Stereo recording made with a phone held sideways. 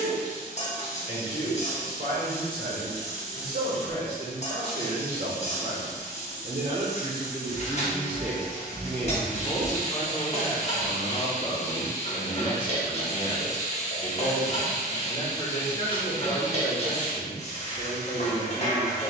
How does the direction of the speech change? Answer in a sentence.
In this clip you hear the speech move to the left.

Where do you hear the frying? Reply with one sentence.
You can hear the frying on the left.